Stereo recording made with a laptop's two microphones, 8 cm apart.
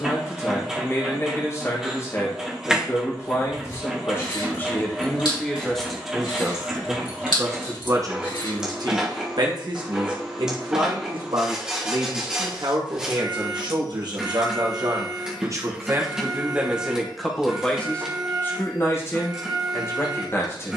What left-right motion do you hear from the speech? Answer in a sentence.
You can hear the speech go right and come back.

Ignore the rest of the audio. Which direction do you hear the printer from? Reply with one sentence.
You can hear the printer in the centre.